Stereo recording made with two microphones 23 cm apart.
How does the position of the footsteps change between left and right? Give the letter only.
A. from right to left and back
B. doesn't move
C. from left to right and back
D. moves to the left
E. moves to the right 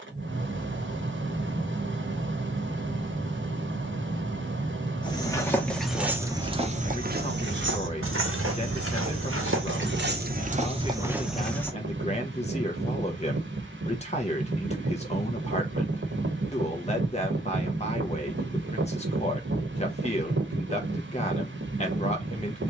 C.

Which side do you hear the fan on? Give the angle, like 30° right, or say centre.
60° right.